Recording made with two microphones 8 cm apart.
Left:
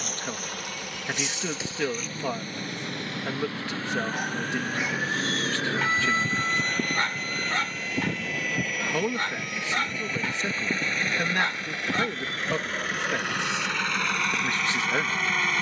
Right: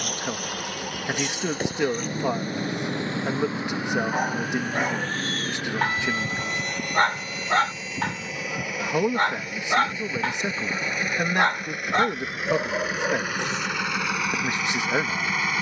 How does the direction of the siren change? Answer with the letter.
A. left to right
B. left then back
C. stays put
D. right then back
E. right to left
E.